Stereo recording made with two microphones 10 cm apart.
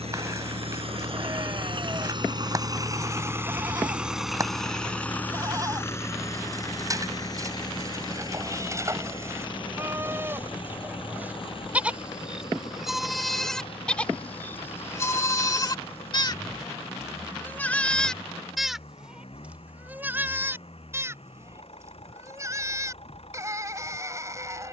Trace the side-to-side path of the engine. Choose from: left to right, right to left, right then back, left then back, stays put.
right to left.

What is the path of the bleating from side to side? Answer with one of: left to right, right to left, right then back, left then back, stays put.
left then back.